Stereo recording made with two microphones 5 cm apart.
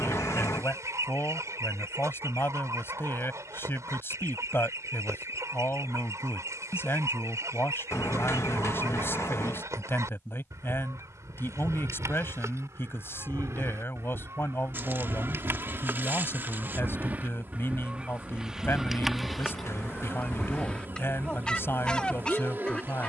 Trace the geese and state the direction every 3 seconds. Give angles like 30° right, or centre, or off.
70° right, 70° right, 70° right, 70° right, 60° right, 40° right, centre, 20° left.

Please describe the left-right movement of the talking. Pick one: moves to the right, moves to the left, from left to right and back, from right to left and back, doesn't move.
doesn't move.